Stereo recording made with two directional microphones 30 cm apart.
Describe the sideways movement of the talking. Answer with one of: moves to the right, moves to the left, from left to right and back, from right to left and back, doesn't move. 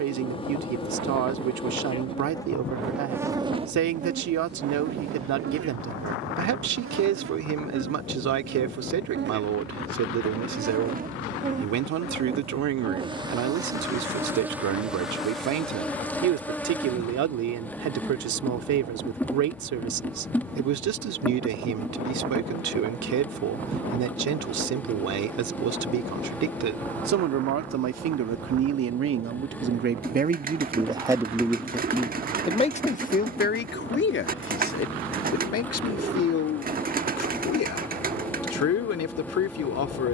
moves to the left.